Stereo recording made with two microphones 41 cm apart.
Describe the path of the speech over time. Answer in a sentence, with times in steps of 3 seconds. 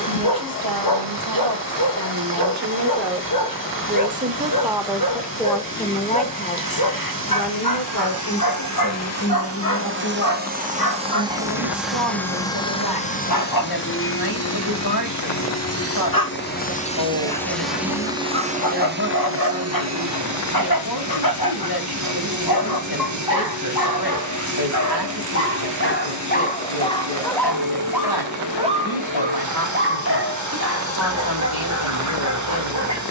In this clip you hear the speech on the right from 0 s, in the centre from 3 s and on the left from 6 s.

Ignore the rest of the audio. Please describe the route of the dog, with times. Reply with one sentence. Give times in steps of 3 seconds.
In this clip you hear the dog on the left from 0 s, in the centre from 27 s and on the right from 30 s.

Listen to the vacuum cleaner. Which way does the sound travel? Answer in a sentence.
In this clip you hear the vacuum cleaner go left and come back.